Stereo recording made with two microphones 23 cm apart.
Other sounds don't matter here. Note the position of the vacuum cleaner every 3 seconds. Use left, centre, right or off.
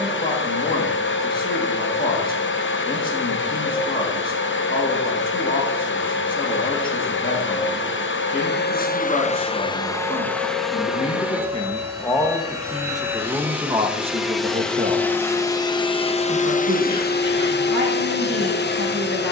left, left, left, centre, centre, left, left.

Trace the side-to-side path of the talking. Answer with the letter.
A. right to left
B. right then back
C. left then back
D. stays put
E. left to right
E.